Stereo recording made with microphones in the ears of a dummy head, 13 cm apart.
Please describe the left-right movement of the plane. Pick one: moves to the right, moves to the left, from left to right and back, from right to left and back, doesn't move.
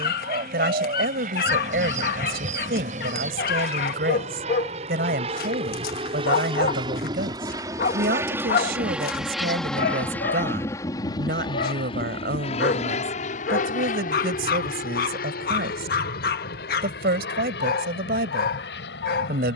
moves to the left.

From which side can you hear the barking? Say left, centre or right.
left.